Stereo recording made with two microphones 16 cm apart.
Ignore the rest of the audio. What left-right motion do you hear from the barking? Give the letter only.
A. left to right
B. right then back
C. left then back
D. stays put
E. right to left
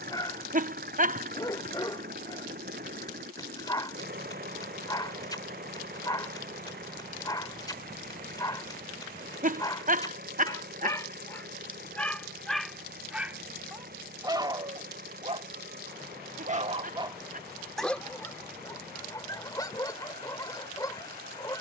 B.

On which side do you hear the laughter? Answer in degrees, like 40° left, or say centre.
60° right.